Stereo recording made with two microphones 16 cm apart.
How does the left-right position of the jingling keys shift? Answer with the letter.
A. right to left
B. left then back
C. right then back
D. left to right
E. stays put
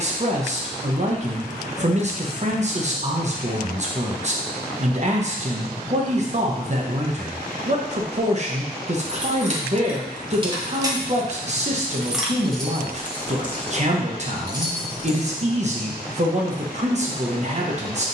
B.